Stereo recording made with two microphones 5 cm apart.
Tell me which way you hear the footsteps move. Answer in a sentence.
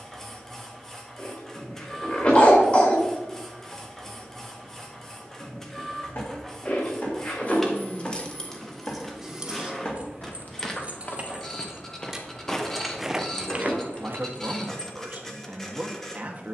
You can hear the footsteps travel towards the right.